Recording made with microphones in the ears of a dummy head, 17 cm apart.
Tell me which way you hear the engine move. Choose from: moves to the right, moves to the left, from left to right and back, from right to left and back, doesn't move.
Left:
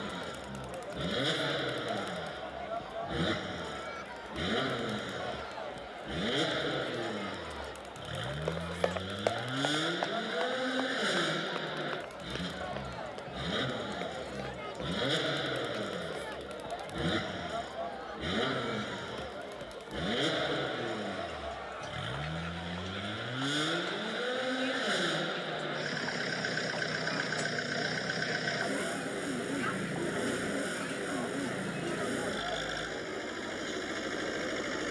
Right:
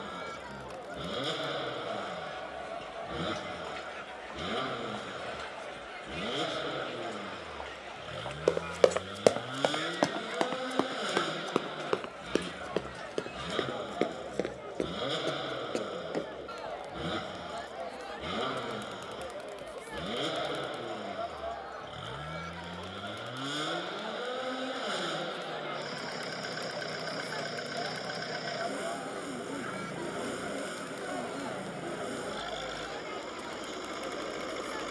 doesn't move.